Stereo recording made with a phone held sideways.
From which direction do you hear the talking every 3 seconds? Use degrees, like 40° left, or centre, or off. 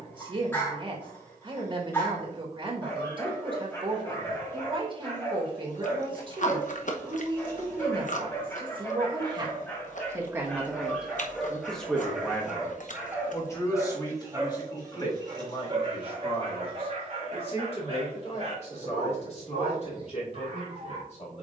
40° right, 40° right, 40° right, 10° right, 20° left, 40° left, 50° left.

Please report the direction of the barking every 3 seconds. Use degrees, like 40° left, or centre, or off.
20° left, 20° left, 20° left, 10° left, 20° right, 40° right, 50° right.